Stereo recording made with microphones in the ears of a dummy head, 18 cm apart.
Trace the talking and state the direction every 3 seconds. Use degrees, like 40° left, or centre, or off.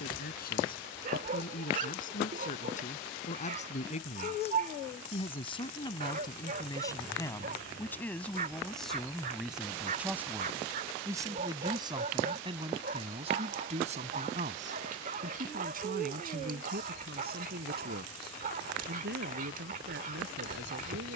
50° left, 30° left, 10° left, 10° right, 30° right, 50° right, 60° right.